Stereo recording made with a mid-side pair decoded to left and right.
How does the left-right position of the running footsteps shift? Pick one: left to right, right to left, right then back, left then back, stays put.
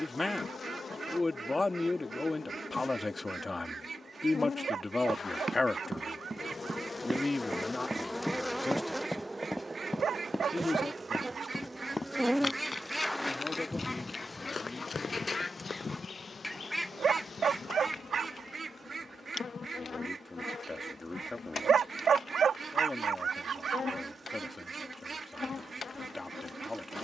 right to left.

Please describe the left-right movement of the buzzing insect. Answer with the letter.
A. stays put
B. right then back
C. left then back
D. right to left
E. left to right
B.